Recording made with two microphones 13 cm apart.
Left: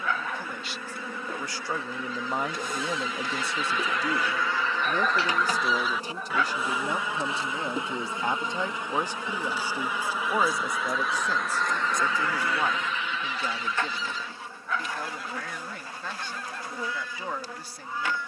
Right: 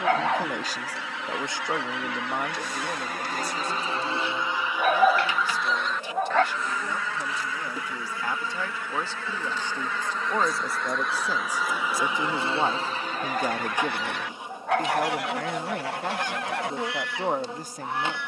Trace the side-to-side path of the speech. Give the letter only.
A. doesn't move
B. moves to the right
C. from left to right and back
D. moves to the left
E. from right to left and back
E.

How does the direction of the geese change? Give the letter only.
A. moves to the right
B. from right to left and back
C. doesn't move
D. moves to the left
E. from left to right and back
B.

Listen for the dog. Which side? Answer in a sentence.
In this clip you hear the dog on the right.